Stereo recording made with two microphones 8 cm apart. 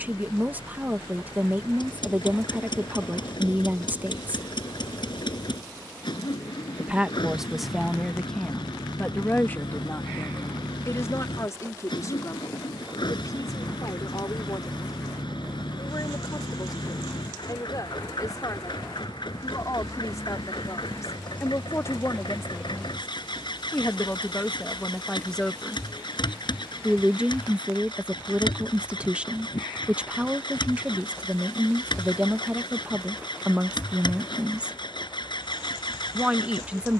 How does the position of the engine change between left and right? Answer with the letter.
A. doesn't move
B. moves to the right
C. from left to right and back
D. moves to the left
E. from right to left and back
A.